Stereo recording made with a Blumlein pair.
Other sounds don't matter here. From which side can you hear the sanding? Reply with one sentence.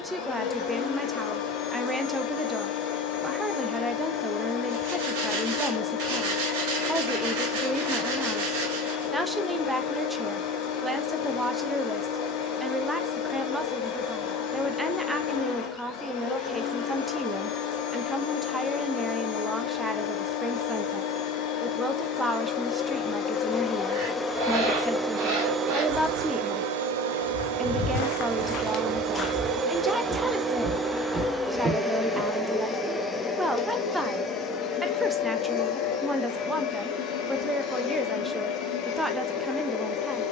In this clip you hear the sanding on the right.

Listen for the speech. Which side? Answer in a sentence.
In this clip you hear the speech in the centre.